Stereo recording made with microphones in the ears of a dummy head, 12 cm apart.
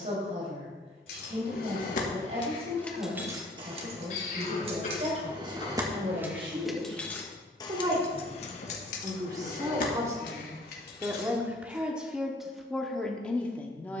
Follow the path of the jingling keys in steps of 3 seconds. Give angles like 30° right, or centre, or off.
50° left, 40° right, 20° left, 70° left, off.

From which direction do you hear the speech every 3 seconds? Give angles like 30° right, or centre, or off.
50° right, 50° right, 40° right, 20° right, 10° left.